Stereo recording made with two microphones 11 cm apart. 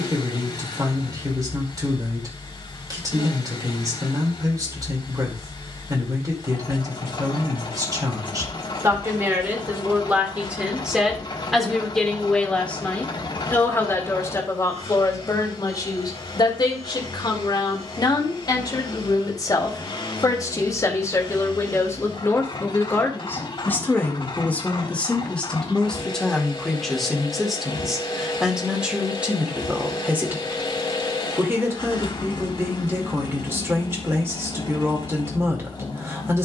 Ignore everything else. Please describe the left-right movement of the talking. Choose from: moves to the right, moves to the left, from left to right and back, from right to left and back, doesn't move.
from right to left and back.